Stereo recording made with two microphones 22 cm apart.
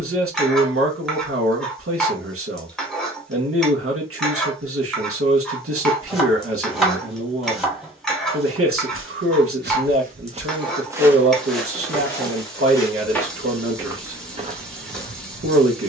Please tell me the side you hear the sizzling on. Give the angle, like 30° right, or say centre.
centre.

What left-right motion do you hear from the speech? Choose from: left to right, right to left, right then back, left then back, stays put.
stays put.